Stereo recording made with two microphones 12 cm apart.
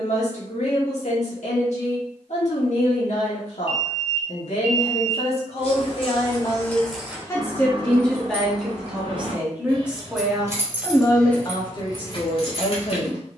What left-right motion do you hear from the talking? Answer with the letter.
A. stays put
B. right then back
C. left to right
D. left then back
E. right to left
B.